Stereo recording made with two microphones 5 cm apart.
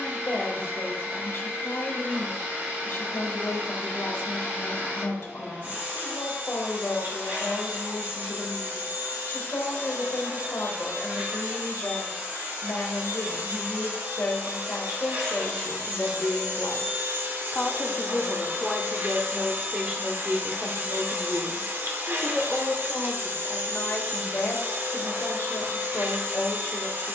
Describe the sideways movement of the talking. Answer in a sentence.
You can hear the talking go right and come back.